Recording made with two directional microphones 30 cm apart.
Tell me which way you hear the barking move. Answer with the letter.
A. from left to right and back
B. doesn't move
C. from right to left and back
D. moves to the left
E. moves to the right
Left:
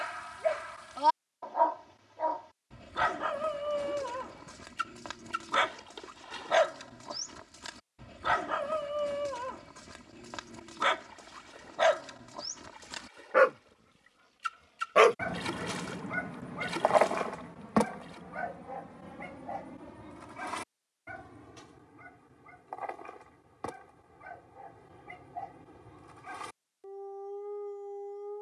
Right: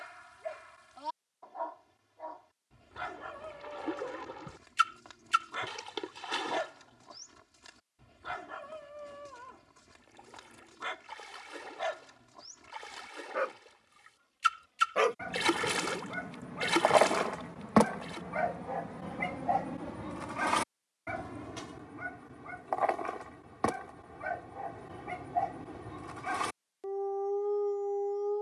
E.